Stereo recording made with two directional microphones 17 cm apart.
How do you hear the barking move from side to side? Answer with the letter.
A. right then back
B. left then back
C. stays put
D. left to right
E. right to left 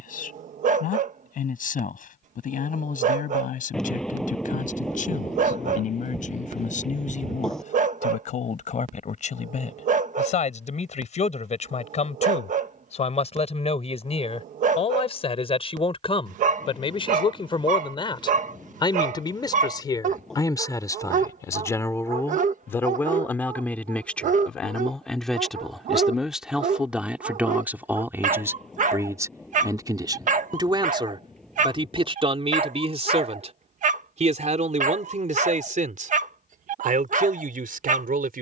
C.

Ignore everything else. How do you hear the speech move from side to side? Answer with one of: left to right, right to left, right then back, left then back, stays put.
left to right.